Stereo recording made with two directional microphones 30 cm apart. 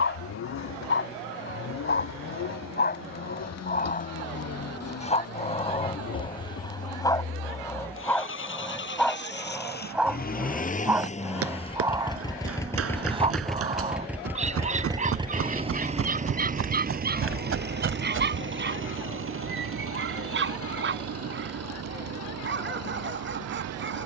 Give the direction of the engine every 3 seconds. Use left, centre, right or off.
left, left, left, left, centre, right, right, right.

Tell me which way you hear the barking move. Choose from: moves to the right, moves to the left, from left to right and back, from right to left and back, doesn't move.
moves to the right.